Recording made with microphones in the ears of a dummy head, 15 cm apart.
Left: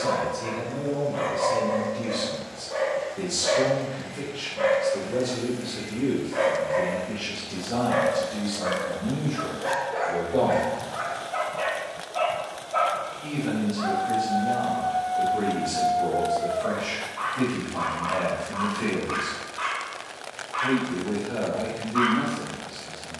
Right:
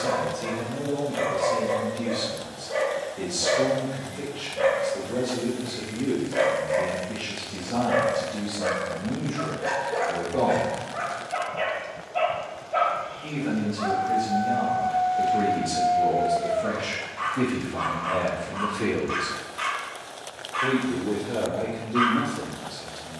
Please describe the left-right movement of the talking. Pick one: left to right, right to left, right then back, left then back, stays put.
left to right.